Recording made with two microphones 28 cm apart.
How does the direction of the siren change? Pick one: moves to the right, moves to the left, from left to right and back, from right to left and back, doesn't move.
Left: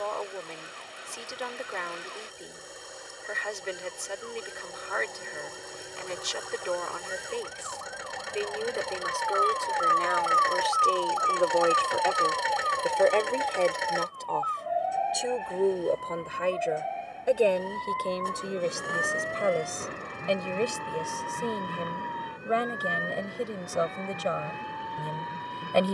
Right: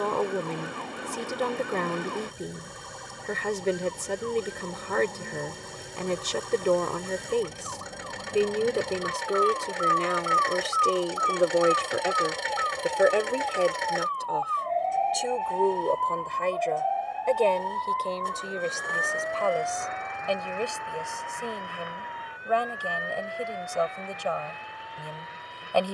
moves to the left.